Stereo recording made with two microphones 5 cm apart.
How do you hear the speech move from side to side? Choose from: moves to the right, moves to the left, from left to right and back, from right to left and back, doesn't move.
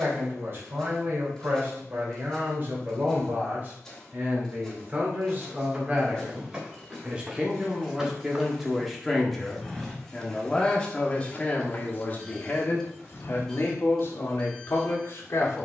moves to the left.